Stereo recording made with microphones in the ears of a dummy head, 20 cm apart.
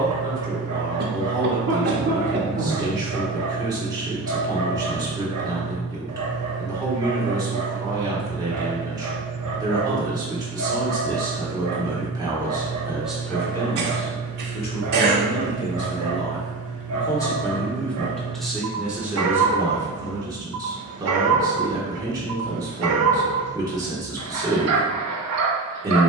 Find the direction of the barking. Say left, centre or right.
right.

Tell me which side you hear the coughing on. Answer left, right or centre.
right.